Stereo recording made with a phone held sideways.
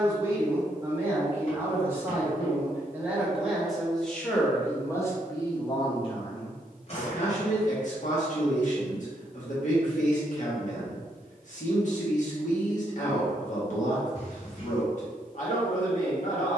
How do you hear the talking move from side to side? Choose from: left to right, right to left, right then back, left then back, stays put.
right to left.